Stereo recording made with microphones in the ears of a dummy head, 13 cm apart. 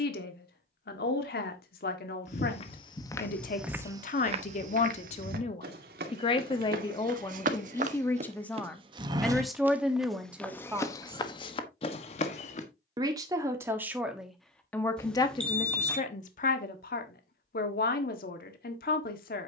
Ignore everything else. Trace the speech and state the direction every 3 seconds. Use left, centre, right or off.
left, left, left, centre, centre, left, left.